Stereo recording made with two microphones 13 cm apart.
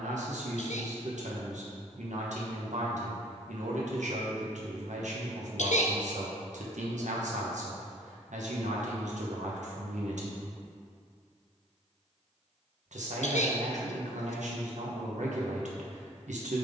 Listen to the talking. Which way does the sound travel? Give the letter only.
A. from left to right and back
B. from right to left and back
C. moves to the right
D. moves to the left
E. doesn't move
E.